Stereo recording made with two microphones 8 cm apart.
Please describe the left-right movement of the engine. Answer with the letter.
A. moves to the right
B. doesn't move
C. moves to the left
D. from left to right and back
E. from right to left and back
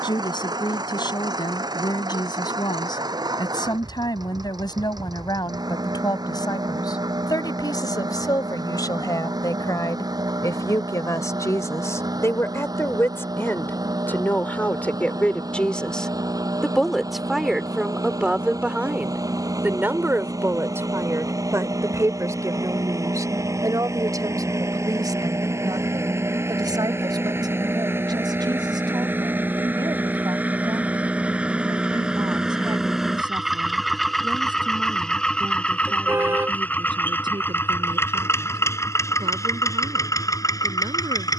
C.